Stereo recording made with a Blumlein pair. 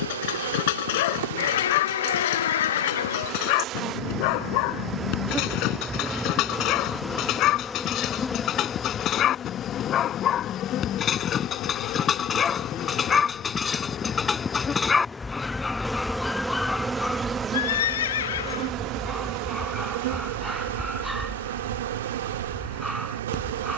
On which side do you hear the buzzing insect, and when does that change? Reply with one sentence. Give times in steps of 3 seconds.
In this clip you hear the buzzing insect on the right from 0 s, in the centre from 6 s, on the left from 9 s, in the centre from 15 s and on the right from 18 s.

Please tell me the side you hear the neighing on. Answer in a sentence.
In this clip you hear the neighing on the left.